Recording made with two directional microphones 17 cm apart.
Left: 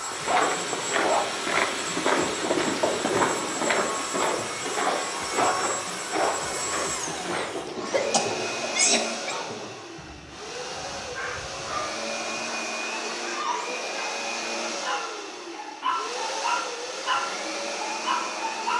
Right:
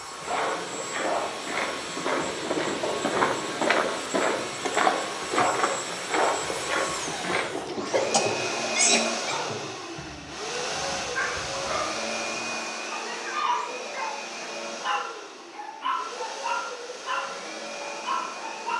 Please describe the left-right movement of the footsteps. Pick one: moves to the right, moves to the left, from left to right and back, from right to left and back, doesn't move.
moves to the right.